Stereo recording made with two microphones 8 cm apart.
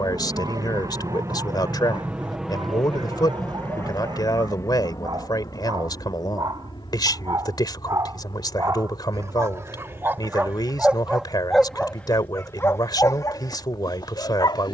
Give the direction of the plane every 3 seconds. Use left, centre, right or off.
right, left, left, left, left.